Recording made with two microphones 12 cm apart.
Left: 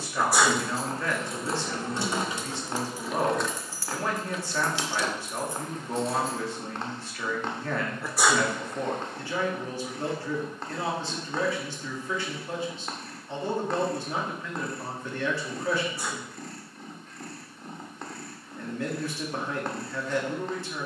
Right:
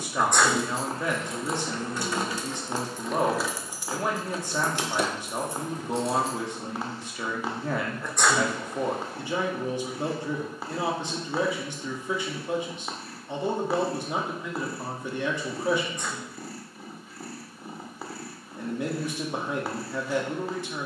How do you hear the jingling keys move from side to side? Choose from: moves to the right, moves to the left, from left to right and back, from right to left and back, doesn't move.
moves to the right.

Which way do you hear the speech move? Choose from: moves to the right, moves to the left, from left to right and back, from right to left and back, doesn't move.
doesn't move.